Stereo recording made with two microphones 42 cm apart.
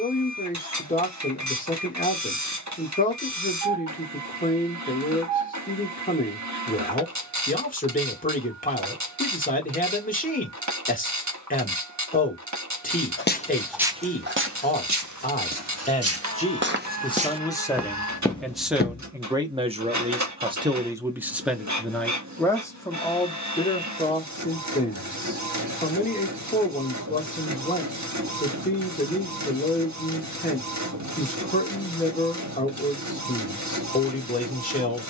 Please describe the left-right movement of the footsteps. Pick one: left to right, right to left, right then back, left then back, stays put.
right then back.